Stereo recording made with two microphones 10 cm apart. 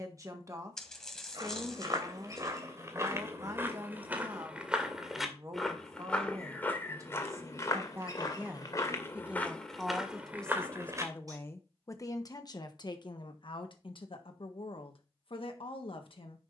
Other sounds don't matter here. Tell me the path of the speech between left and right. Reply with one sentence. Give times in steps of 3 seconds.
In this clip you hear the speech on the right from 0 s, in the centre from 9 s and on the left from 12 s.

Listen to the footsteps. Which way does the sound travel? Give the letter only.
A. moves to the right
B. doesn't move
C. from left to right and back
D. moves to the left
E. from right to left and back
E.